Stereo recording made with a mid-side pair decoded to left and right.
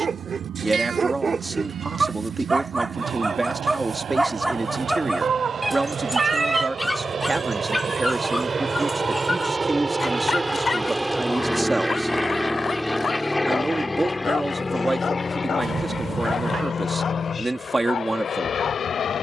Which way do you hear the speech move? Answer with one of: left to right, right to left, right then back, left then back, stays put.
stays put.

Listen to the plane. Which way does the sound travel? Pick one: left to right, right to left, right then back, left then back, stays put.
right to left.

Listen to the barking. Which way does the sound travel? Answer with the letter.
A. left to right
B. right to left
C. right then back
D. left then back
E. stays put
B.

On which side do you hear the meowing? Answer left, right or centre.
right.